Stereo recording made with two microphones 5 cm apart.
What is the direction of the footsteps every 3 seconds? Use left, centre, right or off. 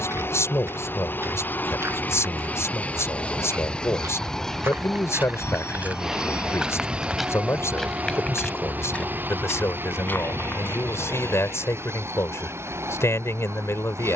right, right, centre, left, off.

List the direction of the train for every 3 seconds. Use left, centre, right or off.
left, centre, right, right, right.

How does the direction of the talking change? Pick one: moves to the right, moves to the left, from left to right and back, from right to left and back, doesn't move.
doesn't move.